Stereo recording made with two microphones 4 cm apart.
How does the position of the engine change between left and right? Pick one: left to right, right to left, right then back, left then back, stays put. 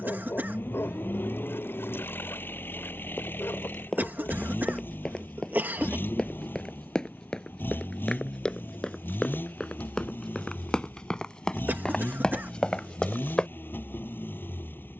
stays put.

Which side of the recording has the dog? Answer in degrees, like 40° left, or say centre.
60° left.